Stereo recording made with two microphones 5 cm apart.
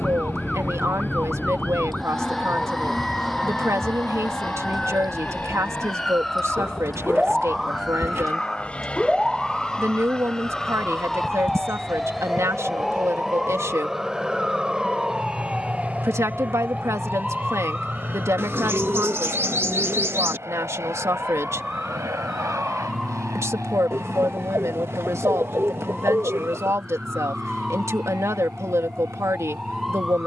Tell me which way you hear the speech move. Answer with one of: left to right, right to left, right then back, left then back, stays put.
stays put.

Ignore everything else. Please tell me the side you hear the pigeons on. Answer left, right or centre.
right.